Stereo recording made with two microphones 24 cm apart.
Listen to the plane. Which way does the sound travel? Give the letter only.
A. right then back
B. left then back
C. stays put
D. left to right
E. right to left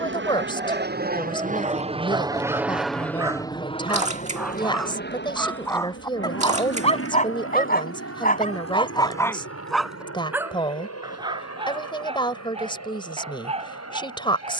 E.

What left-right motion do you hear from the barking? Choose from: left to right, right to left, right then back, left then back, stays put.
left then back.